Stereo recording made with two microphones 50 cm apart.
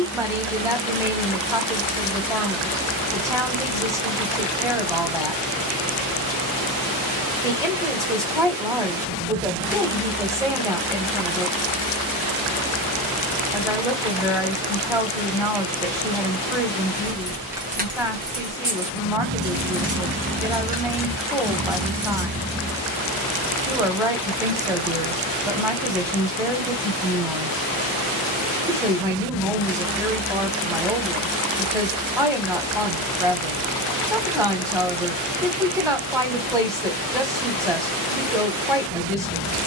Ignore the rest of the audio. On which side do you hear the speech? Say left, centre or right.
centre.